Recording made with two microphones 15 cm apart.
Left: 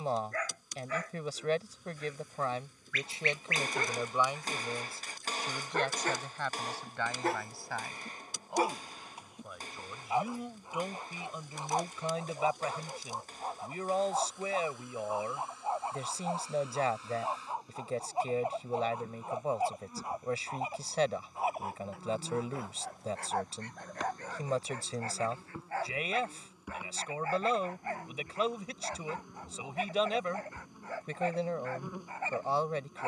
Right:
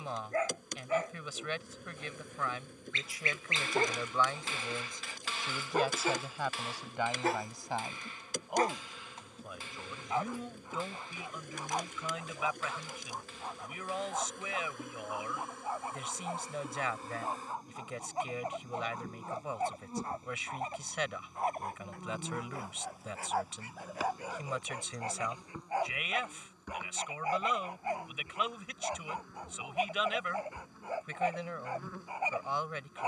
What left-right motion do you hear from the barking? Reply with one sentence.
You can hear the barking go left and come back.